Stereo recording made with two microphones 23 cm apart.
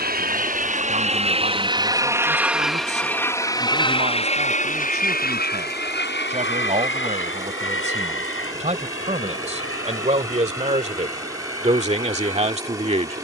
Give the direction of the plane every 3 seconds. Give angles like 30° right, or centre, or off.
20° right, 30° left, 60° left, 70° left, 70° left.